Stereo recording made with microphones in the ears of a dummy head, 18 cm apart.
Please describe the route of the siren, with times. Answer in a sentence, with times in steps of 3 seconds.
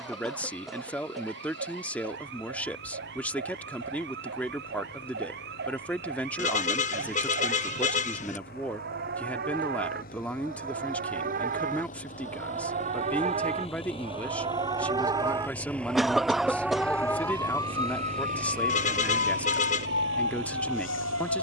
You can hear the siren on the right from 0 s, in the centre from 15 s and on the left from 18 s.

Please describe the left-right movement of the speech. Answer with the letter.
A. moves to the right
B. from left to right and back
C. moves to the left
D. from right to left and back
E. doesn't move
E.